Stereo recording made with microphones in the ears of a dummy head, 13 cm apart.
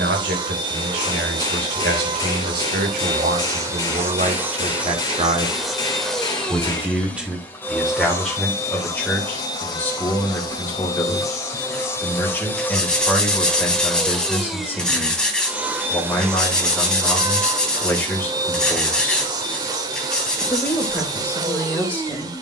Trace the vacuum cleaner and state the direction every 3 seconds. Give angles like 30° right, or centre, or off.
30° right, 10° right, 10° left, 20° left, 10° left, 20° right, 30° right, 30° right.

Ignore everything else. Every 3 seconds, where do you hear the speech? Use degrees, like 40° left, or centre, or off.
70° right, 50° right, centre, 10° left, 10° left, 10° left, 10° left, 10° left.